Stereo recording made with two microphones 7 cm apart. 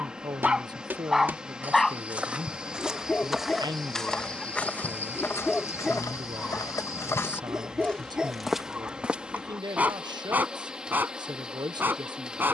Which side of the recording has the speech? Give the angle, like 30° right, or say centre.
80° right.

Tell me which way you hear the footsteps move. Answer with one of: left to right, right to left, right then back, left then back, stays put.
left then back.